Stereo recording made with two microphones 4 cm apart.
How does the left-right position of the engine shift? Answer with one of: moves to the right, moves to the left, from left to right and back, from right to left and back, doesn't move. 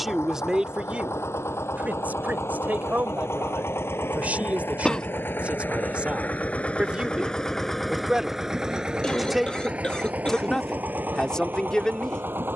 moves to the right.